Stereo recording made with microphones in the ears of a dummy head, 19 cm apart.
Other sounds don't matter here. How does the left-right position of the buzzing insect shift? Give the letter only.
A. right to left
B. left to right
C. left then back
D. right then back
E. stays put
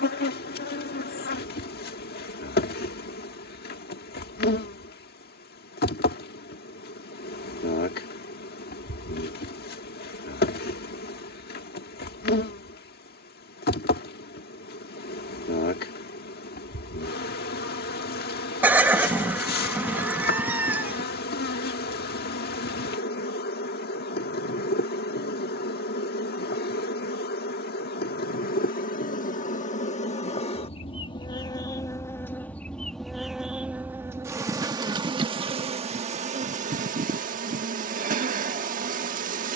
B.